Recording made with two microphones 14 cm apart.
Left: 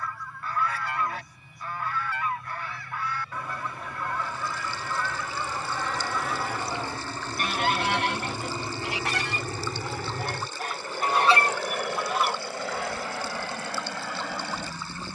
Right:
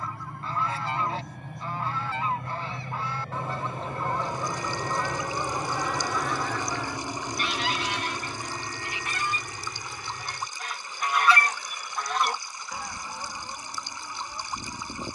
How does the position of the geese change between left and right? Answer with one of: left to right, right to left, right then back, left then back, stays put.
left then back.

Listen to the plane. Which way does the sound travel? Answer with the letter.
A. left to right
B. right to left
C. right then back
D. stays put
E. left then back
B.